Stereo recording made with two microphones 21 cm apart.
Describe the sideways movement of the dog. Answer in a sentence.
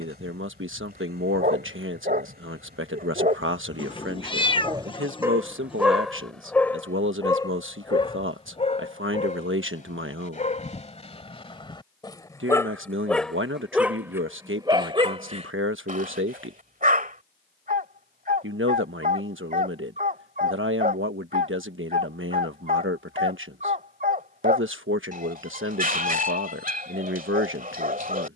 In this clip you hear the dog move from right to left and back again.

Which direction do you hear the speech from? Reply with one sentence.
In this clip you hear the speech on the right.